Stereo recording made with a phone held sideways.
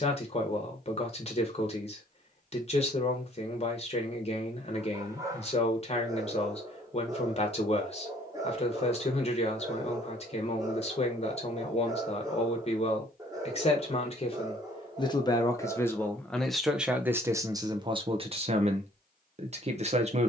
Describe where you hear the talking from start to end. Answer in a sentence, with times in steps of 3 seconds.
In this clip you hear the talking on the left from 0 s, in the centre from 15 s and on the right from 18 s.